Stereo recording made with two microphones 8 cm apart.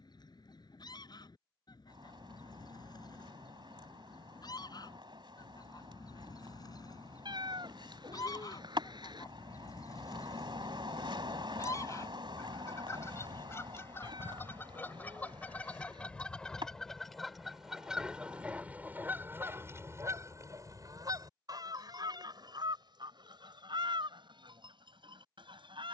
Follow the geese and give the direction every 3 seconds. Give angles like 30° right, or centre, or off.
60° left, 50° left, 50° left, 40° left, 30° left, 10° left, 30° right, 60° right, 70° right.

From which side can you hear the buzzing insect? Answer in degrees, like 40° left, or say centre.
70° right.